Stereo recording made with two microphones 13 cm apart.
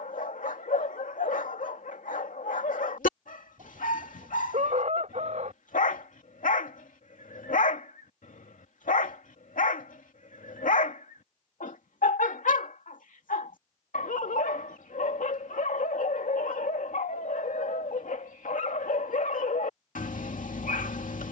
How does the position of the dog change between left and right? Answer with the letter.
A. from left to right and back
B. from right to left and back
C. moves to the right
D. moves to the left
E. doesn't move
E.